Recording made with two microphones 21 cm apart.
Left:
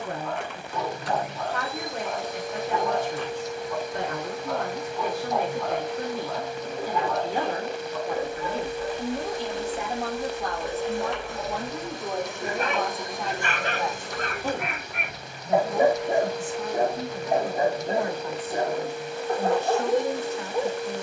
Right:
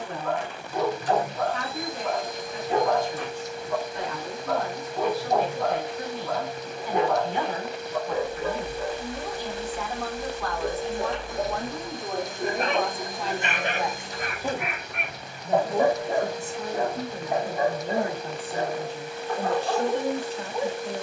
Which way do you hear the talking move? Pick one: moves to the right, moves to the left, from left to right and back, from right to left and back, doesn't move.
moves to the right.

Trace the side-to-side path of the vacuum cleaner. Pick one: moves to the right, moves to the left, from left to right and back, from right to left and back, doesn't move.
doesn't move.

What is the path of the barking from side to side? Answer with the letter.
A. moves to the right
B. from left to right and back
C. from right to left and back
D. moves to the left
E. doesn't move
D.